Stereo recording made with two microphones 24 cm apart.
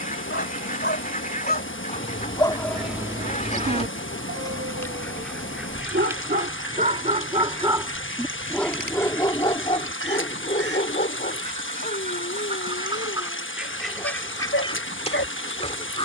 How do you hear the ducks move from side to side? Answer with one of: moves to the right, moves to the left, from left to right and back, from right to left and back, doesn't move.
from left to right and back.